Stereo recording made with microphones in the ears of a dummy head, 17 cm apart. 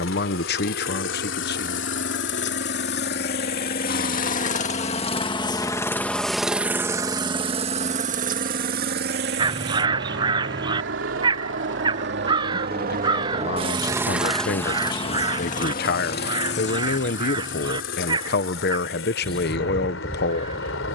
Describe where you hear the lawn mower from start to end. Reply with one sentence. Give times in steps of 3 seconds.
You can hear the lawn mower on the left from 0 s, on the right from 6 s and on the left from 15 s.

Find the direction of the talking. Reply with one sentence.
In this clip you hear the talking on the left.